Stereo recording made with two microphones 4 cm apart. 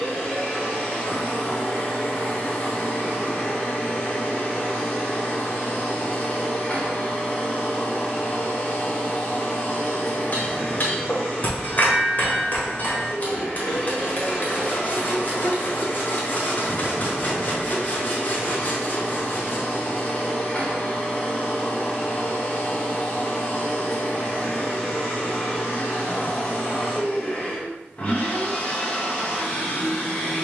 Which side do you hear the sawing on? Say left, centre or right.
left.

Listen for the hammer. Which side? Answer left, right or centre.
left.